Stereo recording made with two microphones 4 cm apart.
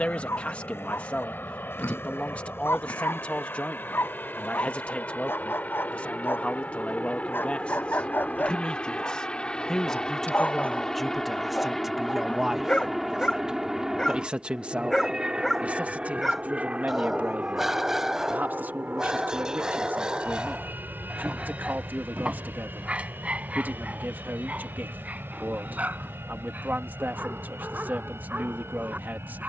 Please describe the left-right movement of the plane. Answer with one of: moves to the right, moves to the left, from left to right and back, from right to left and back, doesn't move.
moves to the right.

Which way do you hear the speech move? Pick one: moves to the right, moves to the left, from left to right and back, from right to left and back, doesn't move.
moves to the right.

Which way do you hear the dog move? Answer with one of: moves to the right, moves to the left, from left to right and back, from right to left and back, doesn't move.
moves to the right.